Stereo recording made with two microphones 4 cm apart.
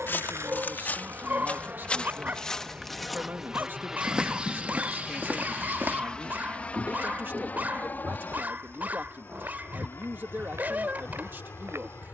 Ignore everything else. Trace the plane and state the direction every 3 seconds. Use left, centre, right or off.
right, centre, left, left.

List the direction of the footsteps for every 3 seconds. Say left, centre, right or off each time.
left, right, right, right.